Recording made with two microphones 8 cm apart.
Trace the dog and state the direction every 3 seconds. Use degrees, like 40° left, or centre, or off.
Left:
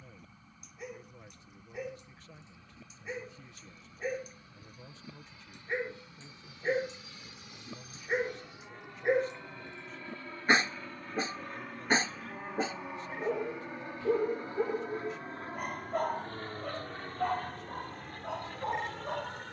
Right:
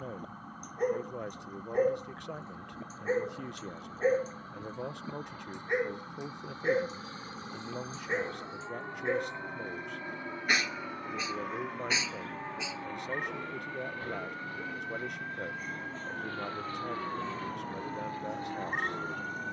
50° right, 30° right, centre, 30° left, 50° left, 60° left, 70° left.